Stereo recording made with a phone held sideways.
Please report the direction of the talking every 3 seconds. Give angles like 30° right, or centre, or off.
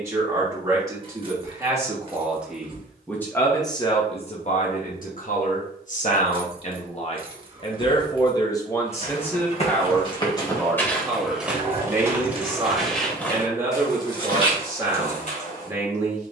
20° right, 40° left, 30° left, centre, 20° right, 20° right.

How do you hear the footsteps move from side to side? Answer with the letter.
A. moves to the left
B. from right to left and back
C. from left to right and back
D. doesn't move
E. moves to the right
C.